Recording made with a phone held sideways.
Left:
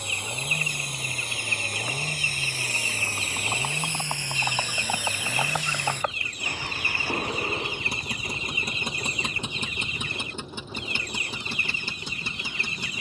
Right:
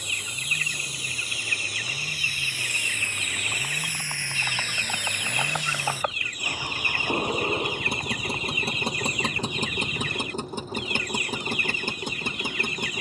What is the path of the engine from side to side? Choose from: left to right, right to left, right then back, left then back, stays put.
left to right.